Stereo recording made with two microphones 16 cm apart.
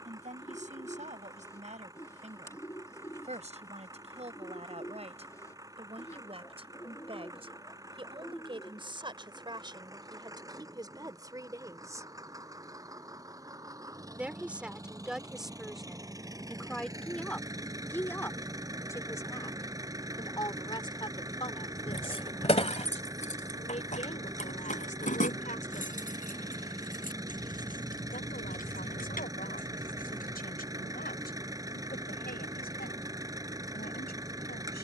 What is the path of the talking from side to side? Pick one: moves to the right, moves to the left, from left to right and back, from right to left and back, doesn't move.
moves to the left.